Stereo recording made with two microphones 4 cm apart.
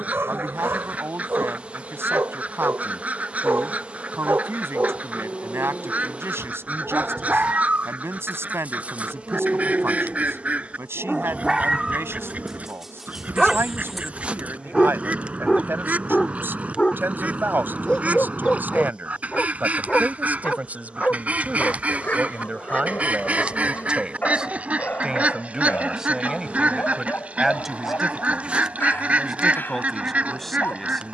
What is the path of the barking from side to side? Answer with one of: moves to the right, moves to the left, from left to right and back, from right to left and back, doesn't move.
moves to the left.